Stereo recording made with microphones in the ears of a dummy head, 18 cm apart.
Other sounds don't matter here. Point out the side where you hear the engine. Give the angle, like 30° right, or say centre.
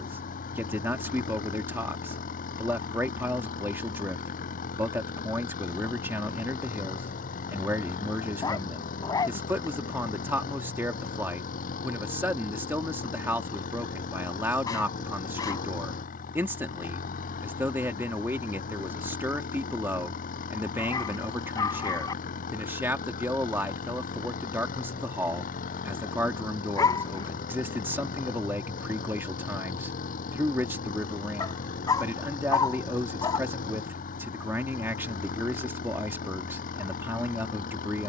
40° left.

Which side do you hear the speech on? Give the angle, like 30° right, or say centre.
10° right.